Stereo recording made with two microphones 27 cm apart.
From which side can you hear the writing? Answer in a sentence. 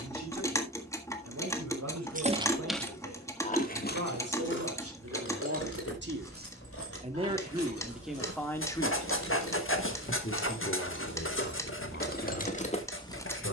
You can hear the writing on the left.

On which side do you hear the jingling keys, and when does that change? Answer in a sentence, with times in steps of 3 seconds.
You can hear the jingling keys in the centre from 0 s and on the left from 3 s.